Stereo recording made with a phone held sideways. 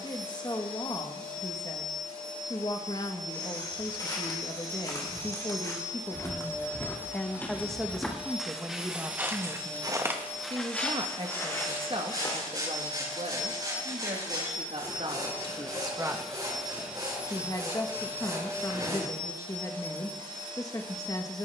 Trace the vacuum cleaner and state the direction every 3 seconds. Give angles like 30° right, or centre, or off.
40° right, 40° right, 10° right, 20° left, 30° left, centre, 30° right.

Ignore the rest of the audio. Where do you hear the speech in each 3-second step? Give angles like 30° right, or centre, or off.
30° left, 30° left, centre, 30° right, 50° right, 10° right, 30° left.